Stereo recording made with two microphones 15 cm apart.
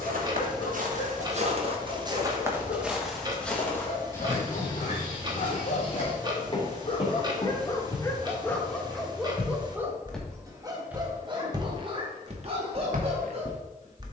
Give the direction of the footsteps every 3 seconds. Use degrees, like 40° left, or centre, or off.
40° right, 20° left, 30° left, 10° right, 60° right.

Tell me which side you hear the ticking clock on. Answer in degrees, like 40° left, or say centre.
30° right.